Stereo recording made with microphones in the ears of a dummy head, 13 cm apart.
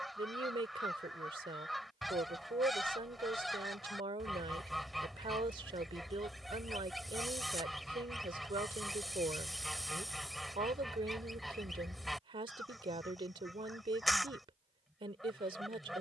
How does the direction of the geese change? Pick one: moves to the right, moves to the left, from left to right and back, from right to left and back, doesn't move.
doesn't move.